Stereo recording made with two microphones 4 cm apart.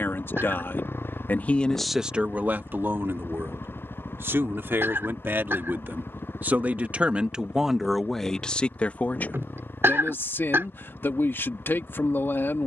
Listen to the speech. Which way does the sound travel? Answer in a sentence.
You can hear the speech move from left to right and back again.